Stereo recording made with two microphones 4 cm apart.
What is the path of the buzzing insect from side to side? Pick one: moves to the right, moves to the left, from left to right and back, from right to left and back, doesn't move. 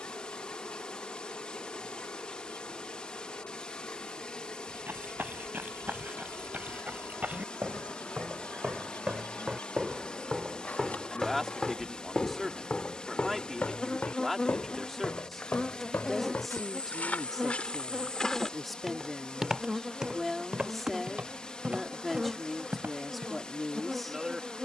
moves to the right.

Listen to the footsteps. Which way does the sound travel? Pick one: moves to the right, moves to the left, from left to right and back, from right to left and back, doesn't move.
from right to left and back.